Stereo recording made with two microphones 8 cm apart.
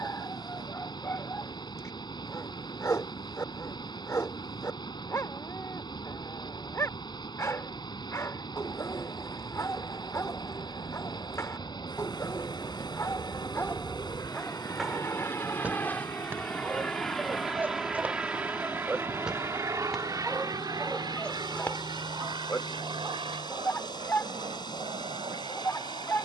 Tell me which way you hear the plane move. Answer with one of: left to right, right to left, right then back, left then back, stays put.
left to right.